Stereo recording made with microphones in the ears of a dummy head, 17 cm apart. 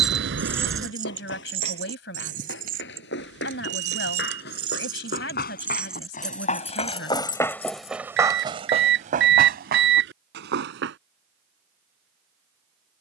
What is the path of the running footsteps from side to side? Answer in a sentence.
You can hear the running footsteps move from left to right.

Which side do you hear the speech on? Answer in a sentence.
You can hear the speech on the left.